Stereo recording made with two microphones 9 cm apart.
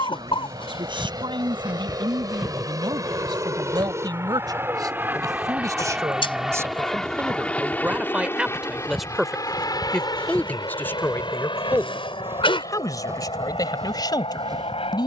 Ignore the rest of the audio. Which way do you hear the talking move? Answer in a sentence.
You can hear the talking move to the left.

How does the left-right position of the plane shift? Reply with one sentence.
In this clip you hear the plane travel towards the left.